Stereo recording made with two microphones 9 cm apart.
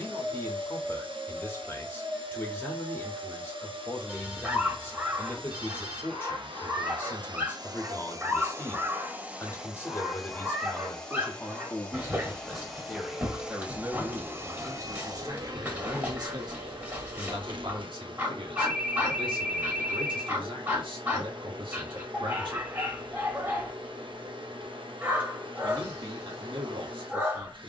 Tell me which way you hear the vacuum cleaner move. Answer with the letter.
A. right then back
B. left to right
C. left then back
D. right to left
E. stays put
C.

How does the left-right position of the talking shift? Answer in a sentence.
In this clip you hear the talking move from left to right.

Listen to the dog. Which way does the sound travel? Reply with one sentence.
You can hear the dog stay in one place.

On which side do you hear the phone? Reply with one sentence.
You can hear the phone in the centre.